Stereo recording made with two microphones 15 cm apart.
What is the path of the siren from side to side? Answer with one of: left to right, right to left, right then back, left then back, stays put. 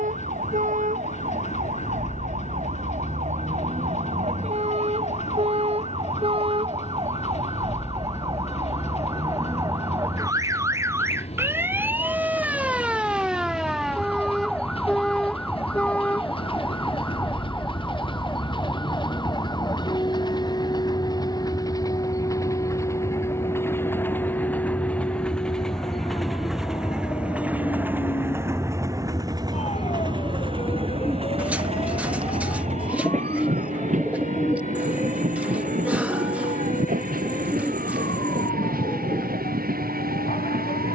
right to left.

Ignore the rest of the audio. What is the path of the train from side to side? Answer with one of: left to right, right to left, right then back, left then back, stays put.
left to right.